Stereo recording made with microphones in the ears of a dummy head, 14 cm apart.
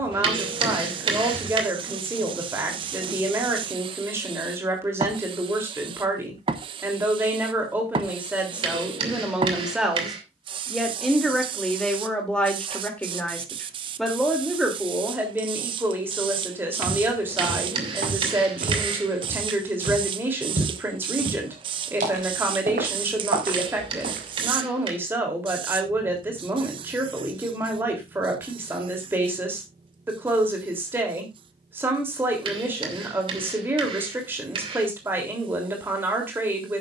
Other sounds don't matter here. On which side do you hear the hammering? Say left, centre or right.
right.